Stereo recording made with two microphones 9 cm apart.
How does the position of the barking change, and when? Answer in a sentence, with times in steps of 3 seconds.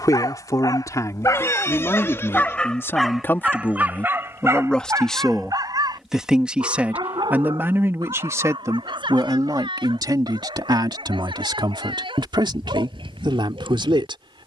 You can hear the barking on the left from 0 s and on the right from 3 s.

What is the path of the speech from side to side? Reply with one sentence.
You can hear the speech move from left to right.